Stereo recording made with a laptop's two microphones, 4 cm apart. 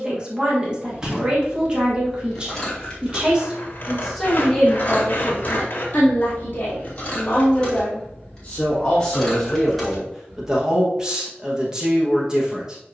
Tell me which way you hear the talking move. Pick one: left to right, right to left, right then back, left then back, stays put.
left then back.